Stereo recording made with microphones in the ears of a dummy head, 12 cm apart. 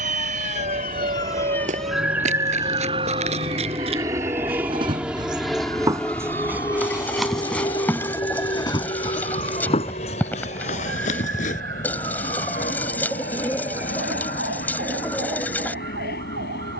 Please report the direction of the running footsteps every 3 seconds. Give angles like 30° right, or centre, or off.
60° right, 40° right, centre, 50° left, off, off.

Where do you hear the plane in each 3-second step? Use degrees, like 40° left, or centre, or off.
50° right, 20° right, 30° left, 50° left, 60° left, 70° left.